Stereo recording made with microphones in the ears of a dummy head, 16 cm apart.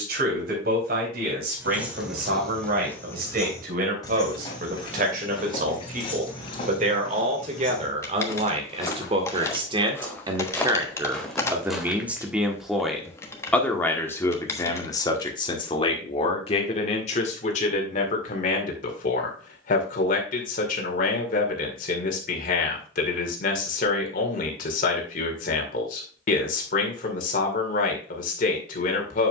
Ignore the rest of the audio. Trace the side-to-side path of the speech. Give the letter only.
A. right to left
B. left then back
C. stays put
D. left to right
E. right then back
A.